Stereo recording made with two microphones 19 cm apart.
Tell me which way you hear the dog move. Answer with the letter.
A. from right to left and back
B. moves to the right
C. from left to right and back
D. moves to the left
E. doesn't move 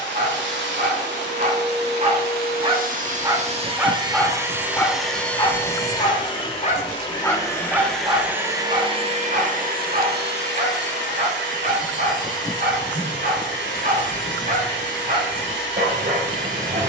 A.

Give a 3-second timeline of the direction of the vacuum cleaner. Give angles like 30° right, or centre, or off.
60° right, 10° right, 10° left, 60° right, 70° right, 70° right.